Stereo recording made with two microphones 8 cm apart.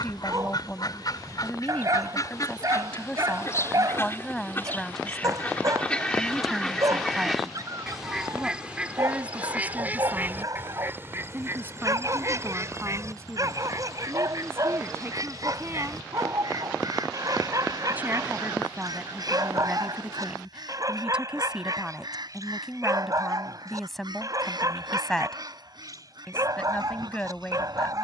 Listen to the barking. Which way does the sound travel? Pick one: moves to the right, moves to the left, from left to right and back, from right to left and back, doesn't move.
doesn't move.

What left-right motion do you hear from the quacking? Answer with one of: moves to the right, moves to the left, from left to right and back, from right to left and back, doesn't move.
moves to the right.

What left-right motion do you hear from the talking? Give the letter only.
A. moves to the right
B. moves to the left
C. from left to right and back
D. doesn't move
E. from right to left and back
C.